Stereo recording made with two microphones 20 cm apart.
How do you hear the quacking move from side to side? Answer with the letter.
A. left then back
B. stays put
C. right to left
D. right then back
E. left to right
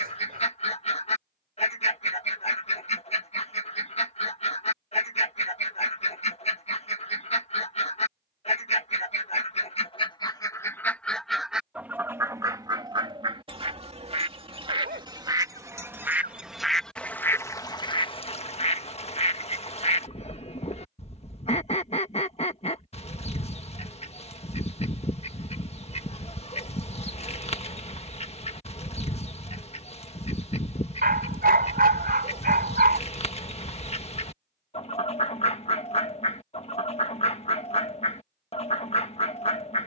D.